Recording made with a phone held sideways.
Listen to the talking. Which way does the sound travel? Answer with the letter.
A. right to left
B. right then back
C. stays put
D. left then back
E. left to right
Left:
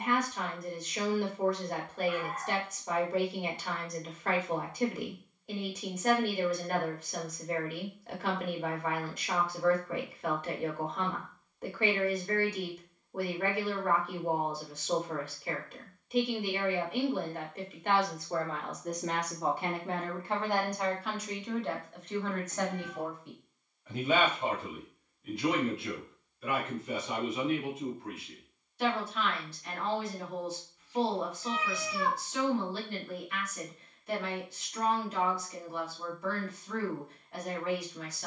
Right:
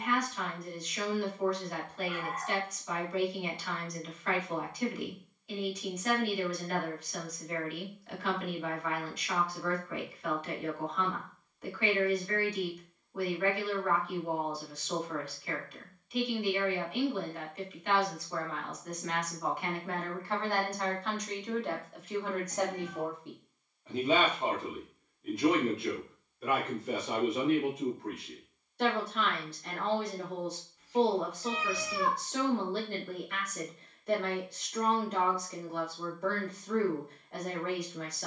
E.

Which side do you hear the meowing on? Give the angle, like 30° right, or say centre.
30° right.